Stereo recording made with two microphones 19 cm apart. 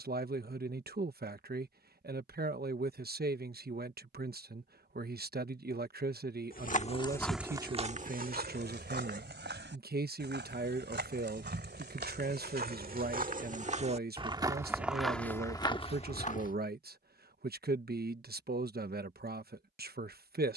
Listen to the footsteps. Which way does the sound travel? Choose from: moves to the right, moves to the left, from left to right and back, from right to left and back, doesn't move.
from left to right and back.